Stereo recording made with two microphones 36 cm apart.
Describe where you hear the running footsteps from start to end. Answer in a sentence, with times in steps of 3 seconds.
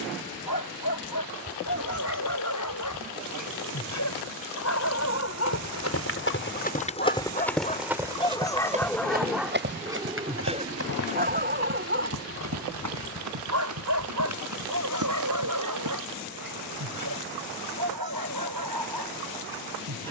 You can hear the running footsteps not at all from 0 s, on the left from 3 s, in the centre from 6 s, on the right from 9 s and not at all from 18 s.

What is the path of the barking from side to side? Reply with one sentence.
In this clip you hear the barking travel towards the right.